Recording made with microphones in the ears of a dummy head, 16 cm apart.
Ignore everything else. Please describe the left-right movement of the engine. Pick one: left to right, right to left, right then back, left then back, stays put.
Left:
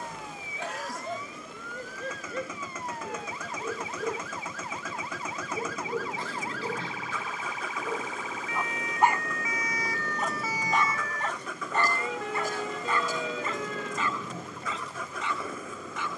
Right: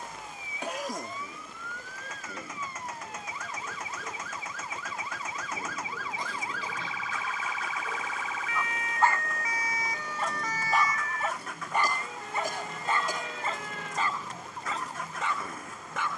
stays put.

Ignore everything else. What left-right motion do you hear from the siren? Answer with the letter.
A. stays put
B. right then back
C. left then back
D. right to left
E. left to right
D.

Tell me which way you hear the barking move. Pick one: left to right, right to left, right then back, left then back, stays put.
left to right.